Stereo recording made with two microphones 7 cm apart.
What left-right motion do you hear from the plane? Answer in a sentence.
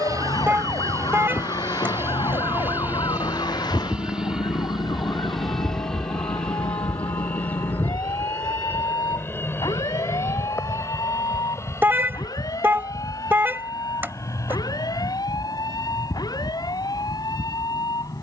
In this clip you hear the plane move from right to left.